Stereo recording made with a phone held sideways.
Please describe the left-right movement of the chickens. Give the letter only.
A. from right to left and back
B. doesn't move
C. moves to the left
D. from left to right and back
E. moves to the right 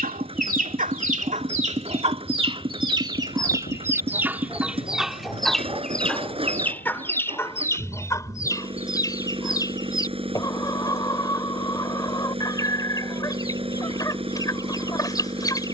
C.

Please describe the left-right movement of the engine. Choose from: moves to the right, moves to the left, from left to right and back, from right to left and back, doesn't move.
doesn't move.